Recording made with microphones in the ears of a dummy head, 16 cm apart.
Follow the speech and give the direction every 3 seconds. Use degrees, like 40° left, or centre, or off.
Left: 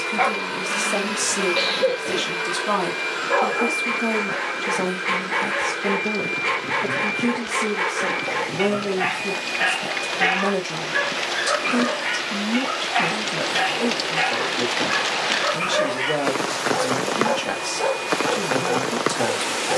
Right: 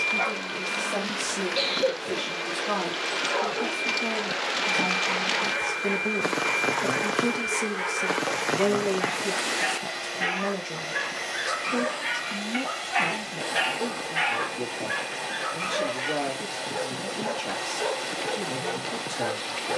50° left, 20° left, 30° right, 10° left, 50° left, 50° left, 50° left.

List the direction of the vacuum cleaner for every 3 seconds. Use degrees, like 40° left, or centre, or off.
50° left, 10° left, 40° right, 50° right, 50° right, 50° right, 50° right.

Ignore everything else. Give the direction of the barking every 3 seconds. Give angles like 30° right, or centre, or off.
40° left, 40° left, 40° left, 20° left, 20° right, 30° left, 40° left.